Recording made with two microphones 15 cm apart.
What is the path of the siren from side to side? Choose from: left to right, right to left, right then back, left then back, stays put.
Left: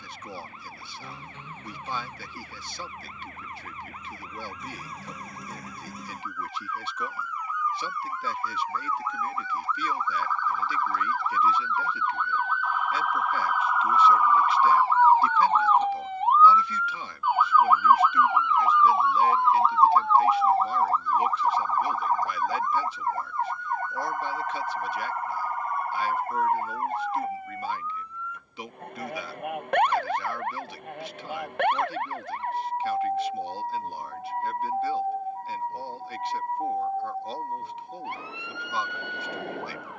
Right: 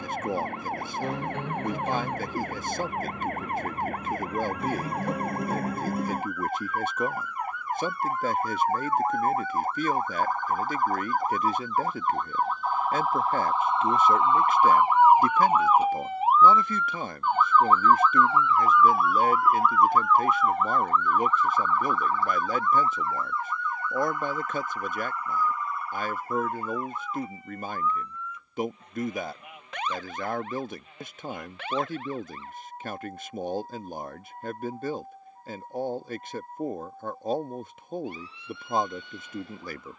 right to left.